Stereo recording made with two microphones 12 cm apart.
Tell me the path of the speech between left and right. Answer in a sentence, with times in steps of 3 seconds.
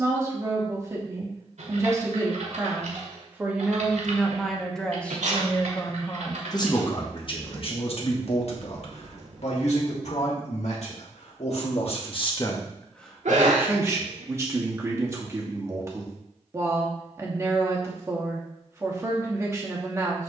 You can hear the speech on the right from 0 s, in the centre from 3 s, on the left from 6 s, in the centre from 12 s and on the right from 15 s.